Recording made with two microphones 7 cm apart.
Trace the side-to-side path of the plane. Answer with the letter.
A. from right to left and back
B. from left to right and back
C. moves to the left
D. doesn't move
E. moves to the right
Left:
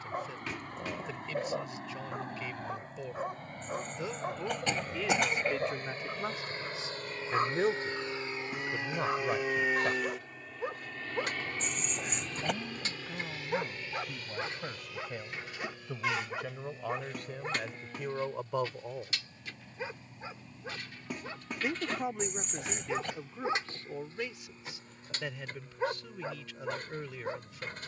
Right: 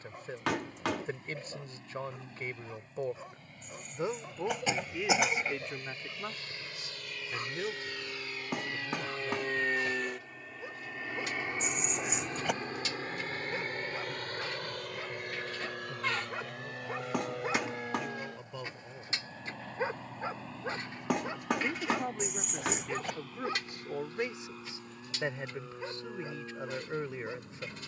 E.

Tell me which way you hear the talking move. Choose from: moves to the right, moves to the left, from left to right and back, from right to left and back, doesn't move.
from right to left and back.